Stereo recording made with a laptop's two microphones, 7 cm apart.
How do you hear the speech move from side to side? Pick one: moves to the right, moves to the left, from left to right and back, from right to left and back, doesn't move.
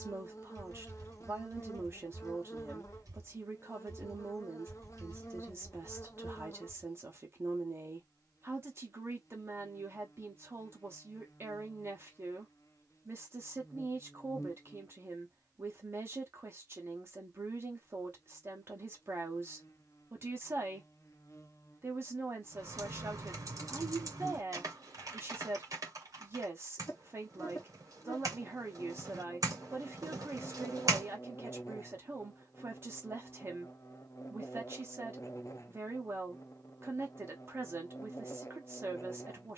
doesn't move.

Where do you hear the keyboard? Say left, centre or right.
right.